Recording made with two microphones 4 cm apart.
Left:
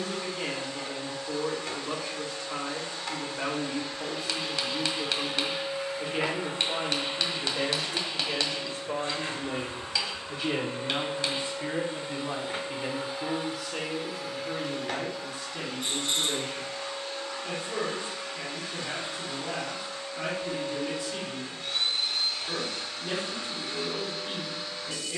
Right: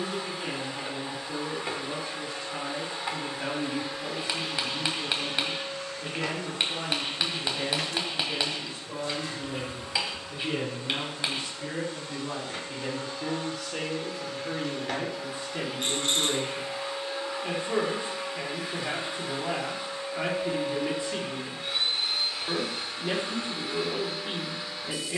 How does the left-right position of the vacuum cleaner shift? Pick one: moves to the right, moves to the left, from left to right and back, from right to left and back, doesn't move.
from right to left and back.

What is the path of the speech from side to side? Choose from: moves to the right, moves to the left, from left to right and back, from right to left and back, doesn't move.
moves to the right.